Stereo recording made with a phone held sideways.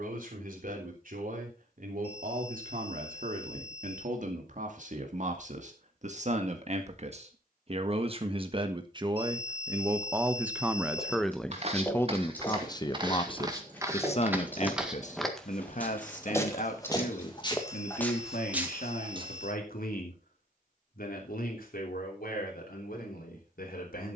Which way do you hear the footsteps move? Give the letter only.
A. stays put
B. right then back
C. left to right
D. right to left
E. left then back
E.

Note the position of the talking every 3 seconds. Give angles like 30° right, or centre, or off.
70° right, 60° right, 40° right, 10° right, 40° left, 60° left, 70° left, 80° left.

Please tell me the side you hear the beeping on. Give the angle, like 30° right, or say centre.
10° left.